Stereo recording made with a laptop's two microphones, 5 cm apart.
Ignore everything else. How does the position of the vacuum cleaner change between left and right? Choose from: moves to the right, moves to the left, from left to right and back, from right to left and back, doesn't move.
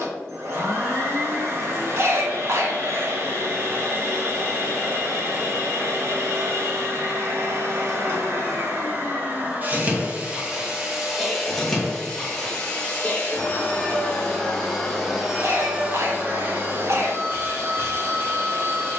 from right to left and back.